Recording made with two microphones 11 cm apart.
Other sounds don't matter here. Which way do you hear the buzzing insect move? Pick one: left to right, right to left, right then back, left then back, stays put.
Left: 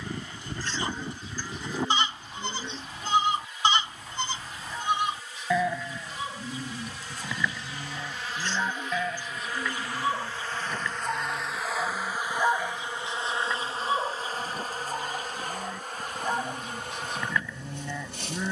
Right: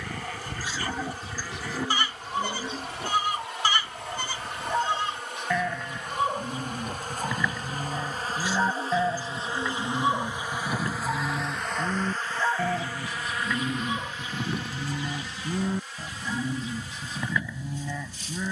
right to left.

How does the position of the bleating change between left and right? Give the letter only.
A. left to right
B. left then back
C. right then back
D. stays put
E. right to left
C.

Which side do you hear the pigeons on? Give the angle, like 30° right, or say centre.
10° right.